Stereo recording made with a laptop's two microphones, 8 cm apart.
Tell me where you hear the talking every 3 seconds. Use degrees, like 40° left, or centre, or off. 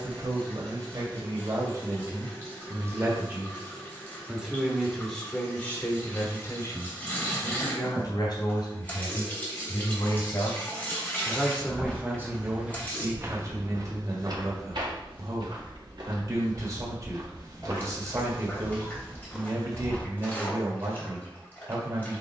50° right, centre, 40° left, 30° left, 40° right, 40° right, 40° right, 40° right.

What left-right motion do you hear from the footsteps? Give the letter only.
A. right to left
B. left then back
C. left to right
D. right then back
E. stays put
D.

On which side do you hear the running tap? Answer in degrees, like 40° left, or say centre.
20° left.